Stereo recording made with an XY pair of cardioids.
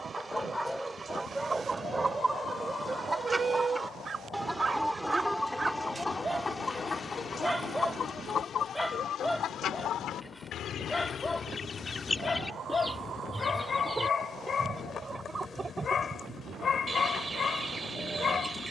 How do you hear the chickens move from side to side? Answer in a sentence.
You can hear the chickens move from right to left and back again.